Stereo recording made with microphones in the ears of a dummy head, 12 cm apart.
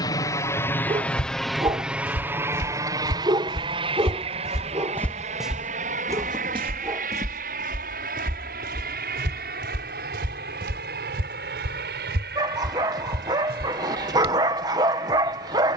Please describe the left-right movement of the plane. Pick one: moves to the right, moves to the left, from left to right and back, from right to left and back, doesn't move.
moves to the right.